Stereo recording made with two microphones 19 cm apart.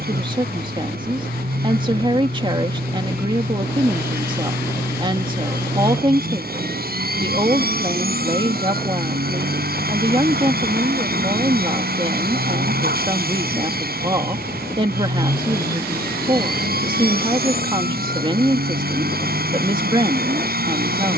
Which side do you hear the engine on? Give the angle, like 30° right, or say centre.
60° right.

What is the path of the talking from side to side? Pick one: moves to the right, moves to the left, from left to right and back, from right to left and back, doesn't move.
doesn't move.